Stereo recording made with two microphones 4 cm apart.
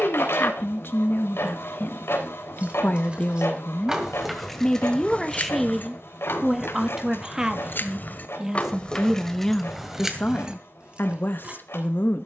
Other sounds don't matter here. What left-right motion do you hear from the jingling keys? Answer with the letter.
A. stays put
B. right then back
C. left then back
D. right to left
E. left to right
C.